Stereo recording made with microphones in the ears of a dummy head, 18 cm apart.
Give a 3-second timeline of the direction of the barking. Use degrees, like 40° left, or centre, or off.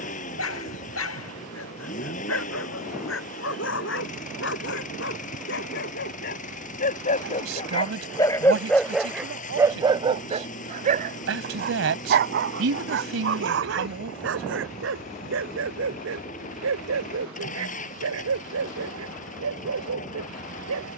70° left, 60° left, 30° left, 30° right, 60° right, 70° right, 80° right.